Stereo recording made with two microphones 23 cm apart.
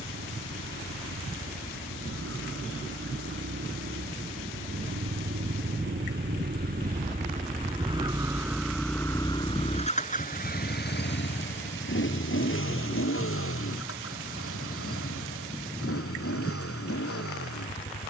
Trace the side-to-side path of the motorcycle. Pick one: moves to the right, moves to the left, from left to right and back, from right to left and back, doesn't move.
moves to the left.